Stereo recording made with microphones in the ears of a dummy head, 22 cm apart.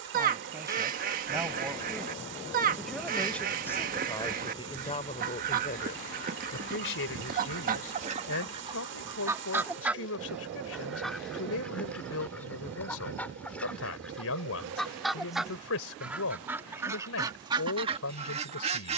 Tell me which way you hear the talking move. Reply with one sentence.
You can hear the talking travel towards the left.